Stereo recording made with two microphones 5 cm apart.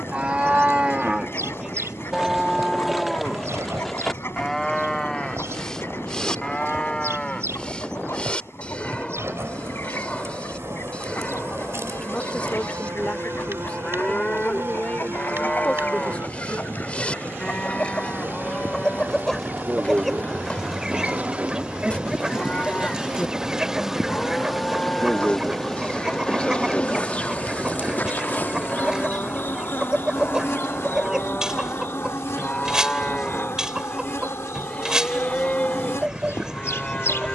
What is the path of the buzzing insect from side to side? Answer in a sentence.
You can hear the buzzing insect go from the right side to the left.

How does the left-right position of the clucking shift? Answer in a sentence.
In this clip you hear the clucking move to the right.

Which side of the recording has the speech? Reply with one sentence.
You can hear the speech on the left.